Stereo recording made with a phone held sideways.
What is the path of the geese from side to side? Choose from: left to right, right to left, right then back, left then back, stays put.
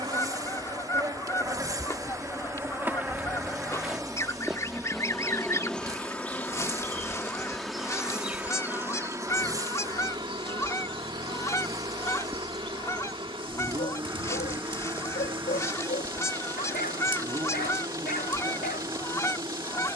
stays put.